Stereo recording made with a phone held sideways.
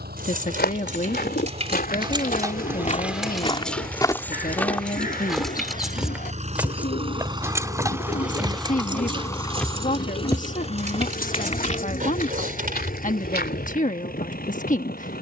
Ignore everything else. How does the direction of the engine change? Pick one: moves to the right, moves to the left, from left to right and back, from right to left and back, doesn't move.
moves to the left.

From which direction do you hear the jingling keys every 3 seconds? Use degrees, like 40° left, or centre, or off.
40° right, centre, 20° right, 40° right, 60° right.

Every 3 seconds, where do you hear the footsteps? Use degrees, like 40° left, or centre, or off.
70° left, 20° left, 20° right, 30° left, 70° left.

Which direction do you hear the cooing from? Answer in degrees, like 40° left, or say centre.
60° left.